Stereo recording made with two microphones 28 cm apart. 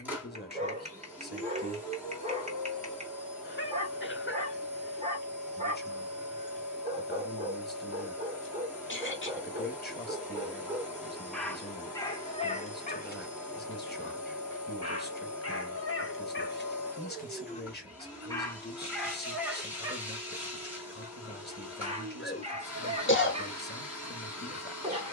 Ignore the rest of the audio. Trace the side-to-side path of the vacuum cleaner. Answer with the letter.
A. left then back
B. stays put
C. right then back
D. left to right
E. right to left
B.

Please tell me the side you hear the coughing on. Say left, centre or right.
left.